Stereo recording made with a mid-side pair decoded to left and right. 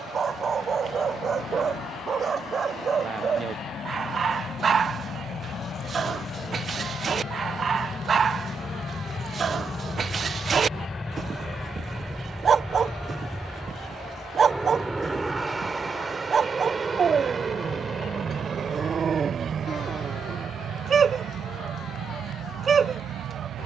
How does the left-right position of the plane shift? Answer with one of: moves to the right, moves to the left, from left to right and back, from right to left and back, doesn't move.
moves to the right.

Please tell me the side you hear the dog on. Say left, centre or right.
right.